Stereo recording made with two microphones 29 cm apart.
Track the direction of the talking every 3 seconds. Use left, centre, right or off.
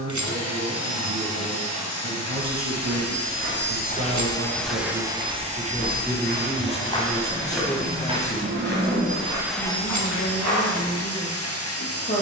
right, right, centre, left.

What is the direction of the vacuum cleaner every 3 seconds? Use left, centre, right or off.
left, centre, right, left.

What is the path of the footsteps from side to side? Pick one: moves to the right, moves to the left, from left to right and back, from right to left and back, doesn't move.
from right to left and back.